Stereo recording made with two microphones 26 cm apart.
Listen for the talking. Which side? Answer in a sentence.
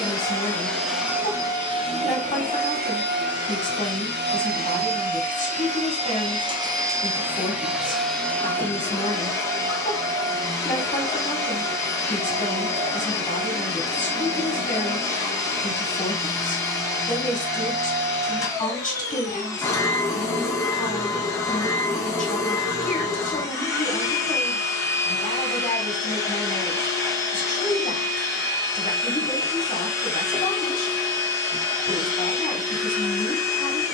In this clip you hear the talking on the left.